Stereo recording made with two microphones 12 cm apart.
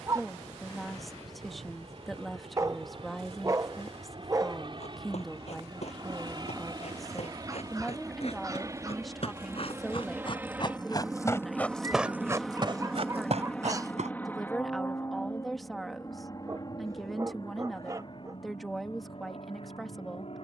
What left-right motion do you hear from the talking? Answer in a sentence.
In this clip you hear the talking stay in one place.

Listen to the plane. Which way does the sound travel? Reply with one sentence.
In this clip you hear the plane move from right to left.